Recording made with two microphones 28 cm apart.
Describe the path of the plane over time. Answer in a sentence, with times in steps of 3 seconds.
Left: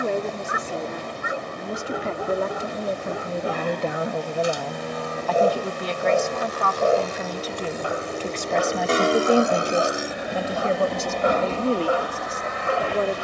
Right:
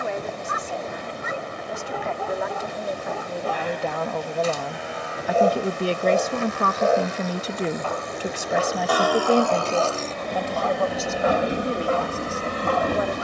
In this clip you hear the plane on the left from 0 s, in the centre from 9 s and on the right from 12 s.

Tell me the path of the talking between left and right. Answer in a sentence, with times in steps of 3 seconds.
You can hear the talking on the left from 0 s, in the centre from 3 s, on the right from 6 s and on the left from 9 s.